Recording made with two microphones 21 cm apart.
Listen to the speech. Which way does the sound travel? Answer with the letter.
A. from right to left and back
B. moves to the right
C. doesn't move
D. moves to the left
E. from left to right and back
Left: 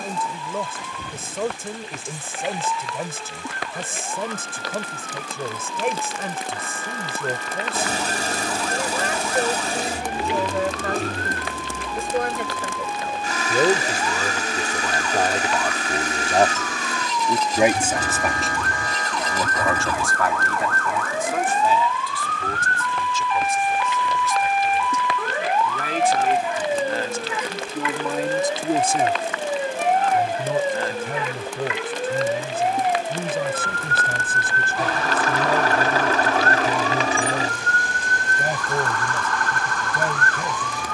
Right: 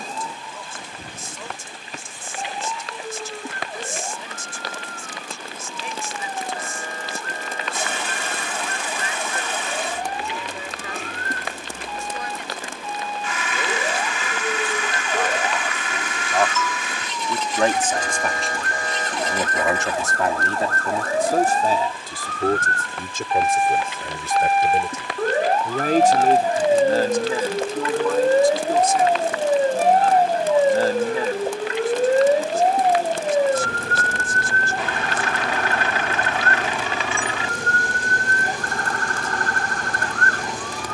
E.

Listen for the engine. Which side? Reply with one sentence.
You can hear the engine on the left.